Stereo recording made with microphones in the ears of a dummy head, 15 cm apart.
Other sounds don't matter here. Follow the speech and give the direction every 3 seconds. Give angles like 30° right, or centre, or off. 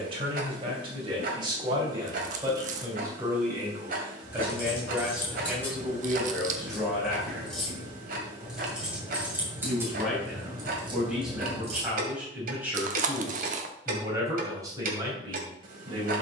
30° right, 10° right, centre, centre, 20° right, 30° right.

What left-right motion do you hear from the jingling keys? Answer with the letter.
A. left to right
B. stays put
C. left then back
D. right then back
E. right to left
A.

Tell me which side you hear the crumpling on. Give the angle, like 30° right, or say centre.
50° right.